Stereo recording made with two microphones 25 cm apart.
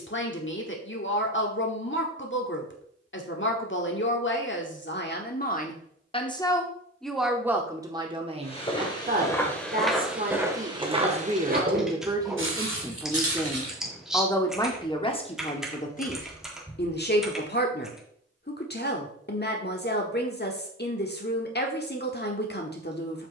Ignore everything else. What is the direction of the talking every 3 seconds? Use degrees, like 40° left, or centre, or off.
50° left, 40° left, 10° right, 30° right, centre, 30° left, 40° left, 40° left.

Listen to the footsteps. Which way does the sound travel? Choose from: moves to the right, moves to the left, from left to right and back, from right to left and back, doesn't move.
moves to the right.